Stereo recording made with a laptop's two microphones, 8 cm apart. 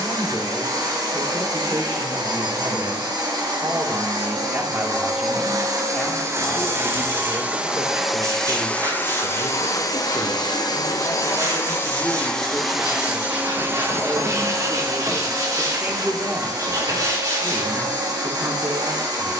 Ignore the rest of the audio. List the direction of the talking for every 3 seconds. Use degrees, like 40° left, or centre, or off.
50° right, 20° right, 40° left, 30° left, centre, 30° right, 40° right.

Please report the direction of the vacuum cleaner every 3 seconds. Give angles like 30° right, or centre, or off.
50° right, 50° right, 10° right, 40° left, 20° right, 50° right, 50° right.